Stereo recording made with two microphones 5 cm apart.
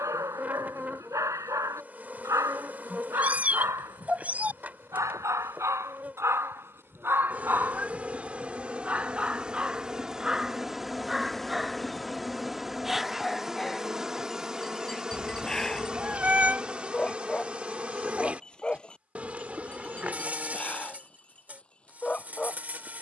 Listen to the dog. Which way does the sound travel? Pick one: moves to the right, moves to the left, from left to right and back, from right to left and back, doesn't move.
moves to the left.